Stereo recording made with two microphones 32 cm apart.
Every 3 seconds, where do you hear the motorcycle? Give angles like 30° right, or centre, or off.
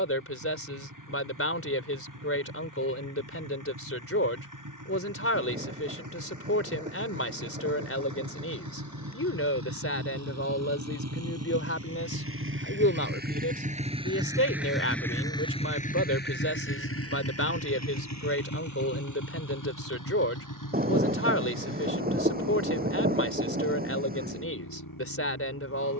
70° right, 70° right, 70° right, 50° right, 20° right, 30° left, 60° left, 70° left, 80° left.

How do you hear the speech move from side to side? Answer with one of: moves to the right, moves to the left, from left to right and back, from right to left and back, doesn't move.
doesn't move.